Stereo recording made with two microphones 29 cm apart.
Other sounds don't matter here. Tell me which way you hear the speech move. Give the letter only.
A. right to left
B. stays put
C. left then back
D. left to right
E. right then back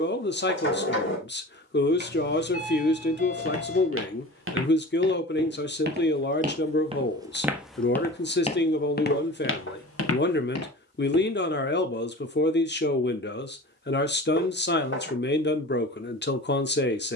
B.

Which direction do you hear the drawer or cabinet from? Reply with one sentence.
You can hear the drawer or cabinet on the left.